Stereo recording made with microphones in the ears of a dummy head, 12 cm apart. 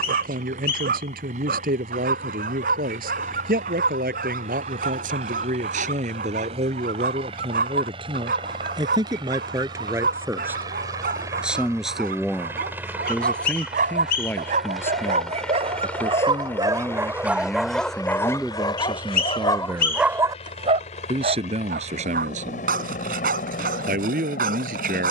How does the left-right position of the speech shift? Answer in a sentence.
You can hear the speech move from right to left and back again.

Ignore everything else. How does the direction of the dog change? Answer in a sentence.
In this clip you hear the dog move from right to left and back again.